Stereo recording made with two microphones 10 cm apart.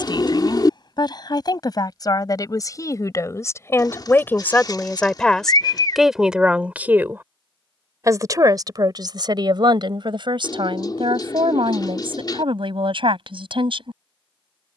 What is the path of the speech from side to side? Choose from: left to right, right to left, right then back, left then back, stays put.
left to right.